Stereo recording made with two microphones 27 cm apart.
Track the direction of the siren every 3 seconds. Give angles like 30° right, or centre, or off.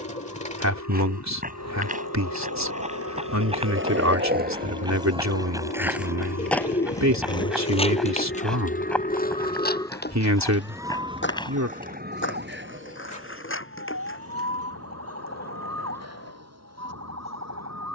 80° left, 70° left, 50° left, centre, 50° right, 70° right.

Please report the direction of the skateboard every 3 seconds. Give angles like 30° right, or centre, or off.
70° right, 30° right, 20° left, 40° left, 50° left, 50° left.